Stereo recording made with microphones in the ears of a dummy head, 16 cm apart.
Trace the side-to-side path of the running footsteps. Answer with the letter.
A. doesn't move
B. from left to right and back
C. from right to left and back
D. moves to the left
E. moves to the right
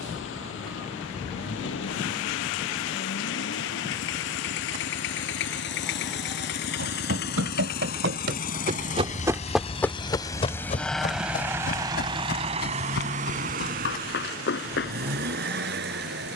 D.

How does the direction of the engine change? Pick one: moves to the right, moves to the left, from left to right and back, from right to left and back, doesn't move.
moves to the right.